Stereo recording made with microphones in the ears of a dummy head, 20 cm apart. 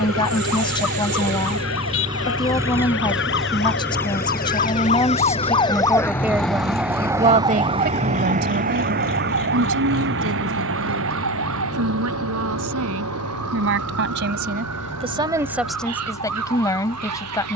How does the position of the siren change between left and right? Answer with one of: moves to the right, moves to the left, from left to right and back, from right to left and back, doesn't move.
moves to the right.